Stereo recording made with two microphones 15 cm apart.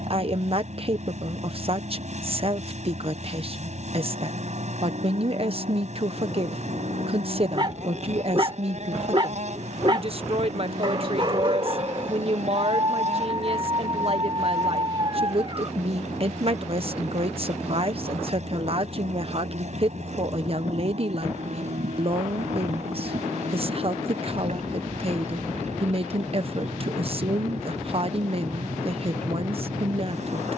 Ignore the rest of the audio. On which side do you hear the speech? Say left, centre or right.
right.